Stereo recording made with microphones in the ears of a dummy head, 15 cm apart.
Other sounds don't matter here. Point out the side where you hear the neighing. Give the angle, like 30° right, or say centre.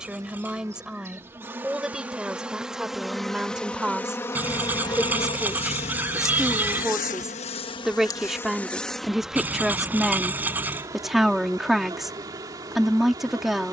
10° right.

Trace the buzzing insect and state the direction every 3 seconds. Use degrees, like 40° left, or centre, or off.
10° right, 20° left, 30° left, 20° right, 20° right.